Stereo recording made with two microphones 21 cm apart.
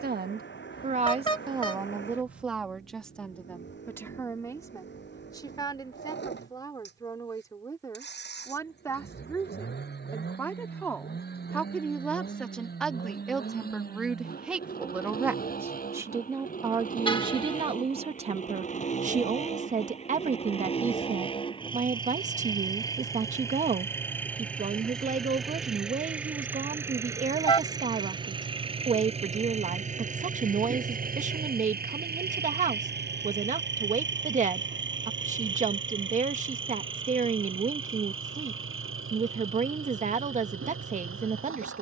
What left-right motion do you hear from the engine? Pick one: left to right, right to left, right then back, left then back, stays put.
left to right.